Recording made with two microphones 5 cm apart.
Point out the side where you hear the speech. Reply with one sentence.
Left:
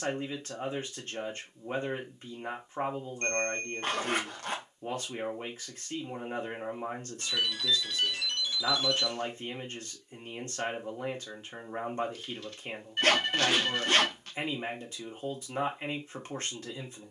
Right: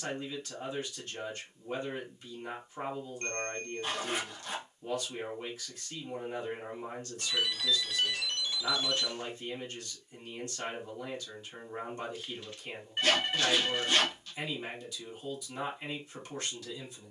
In this clip you hear the speech on the left.